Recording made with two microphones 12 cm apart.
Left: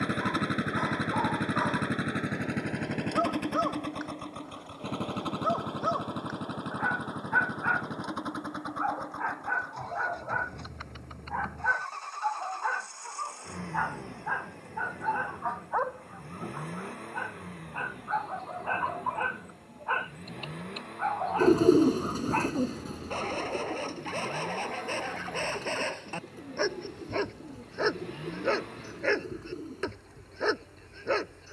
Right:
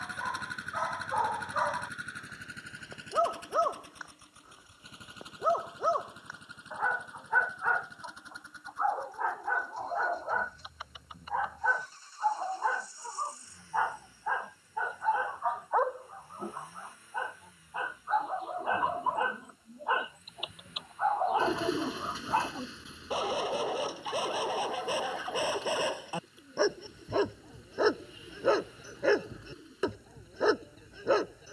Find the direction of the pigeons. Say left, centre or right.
left.